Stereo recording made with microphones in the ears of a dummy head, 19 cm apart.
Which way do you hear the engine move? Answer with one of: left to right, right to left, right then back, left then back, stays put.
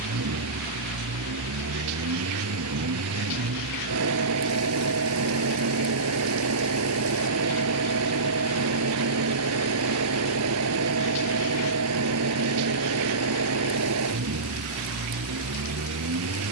stays put.